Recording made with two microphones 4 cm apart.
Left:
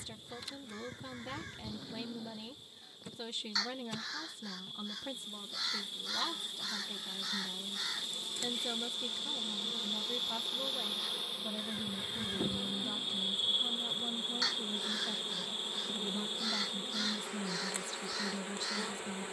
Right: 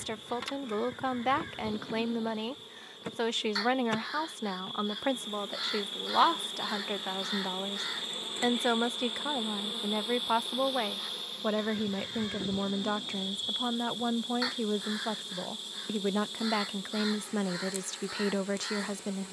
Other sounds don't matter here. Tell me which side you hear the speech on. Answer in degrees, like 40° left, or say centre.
70° right.